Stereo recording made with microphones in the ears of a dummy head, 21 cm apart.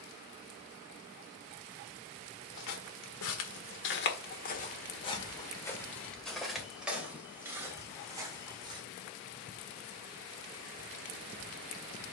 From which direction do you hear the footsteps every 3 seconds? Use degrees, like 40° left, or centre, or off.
70° left, 40° left, 10° right, off.